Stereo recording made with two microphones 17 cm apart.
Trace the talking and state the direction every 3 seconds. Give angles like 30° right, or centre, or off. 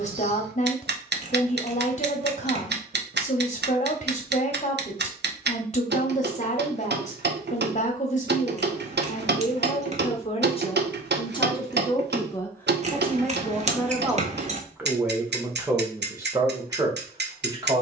40° left, 40° left, 40° left, 30° left, centre, 20° right.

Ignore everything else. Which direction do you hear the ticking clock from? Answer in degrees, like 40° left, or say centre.
90° right.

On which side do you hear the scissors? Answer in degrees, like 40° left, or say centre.
40° right.